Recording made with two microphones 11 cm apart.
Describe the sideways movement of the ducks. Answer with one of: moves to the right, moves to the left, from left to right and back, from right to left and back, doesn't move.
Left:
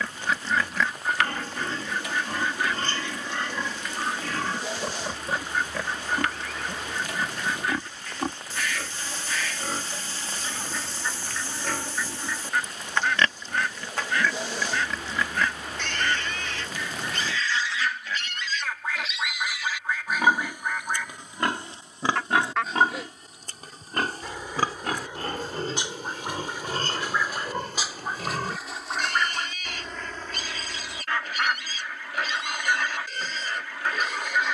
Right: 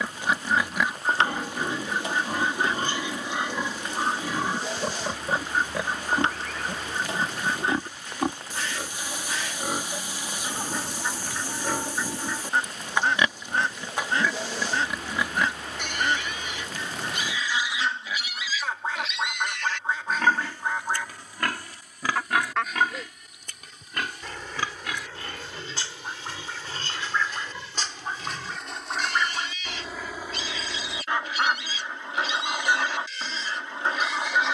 from right to left and back.